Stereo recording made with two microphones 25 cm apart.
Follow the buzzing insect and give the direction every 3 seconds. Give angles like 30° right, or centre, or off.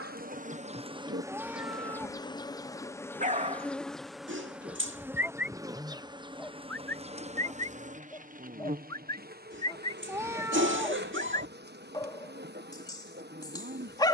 10° right, centre, 30° right, 40° right, 40° right.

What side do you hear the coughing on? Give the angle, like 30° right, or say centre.
50° right.